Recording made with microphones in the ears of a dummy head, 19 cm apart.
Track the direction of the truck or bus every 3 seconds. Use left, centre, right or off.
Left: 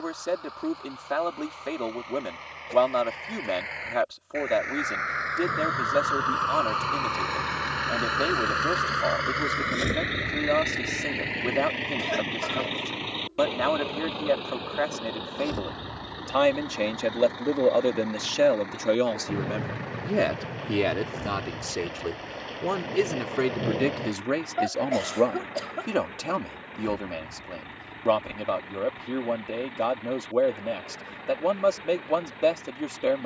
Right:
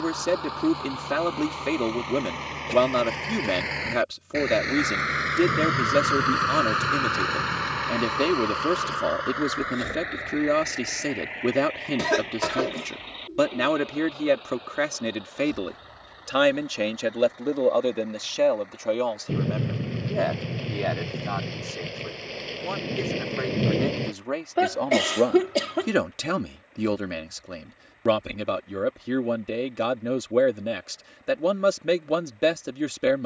right, right, centre, left, left, left, left, left, left, left, left.